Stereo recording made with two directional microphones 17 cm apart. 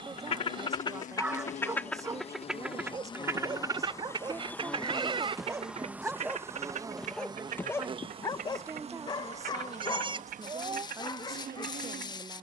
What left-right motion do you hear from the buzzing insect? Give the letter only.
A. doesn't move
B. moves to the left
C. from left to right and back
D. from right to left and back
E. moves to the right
E.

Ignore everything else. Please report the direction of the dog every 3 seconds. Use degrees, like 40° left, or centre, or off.
20° right, 20° right, 10° left, 20° left.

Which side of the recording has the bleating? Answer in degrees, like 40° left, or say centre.
30° right.